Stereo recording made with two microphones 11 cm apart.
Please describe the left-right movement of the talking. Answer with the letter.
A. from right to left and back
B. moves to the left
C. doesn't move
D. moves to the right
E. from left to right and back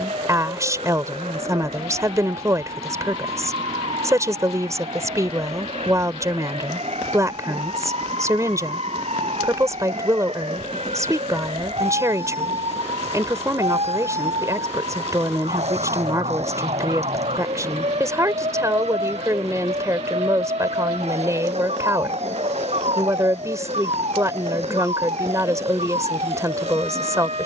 C.